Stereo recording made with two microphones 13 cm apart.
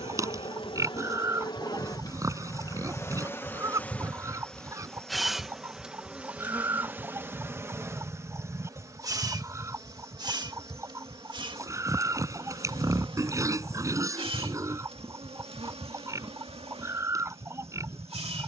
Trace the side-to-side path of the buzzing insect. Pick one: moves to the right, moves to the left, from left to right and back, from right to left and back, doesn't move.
moves to the right.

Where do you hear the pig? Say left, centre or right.
right.